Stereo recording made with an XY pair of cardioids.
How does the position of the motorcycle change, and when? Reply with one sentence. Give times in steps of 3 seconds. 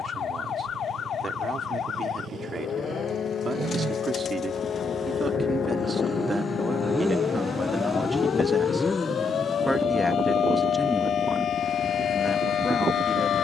In this clip you hear the motorcycle on the right from 0 s, in the centre from 6 s and on the left from 9 s.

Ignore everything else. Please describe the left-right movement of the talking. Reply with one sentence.
You can hear the talking go from the right side to the left.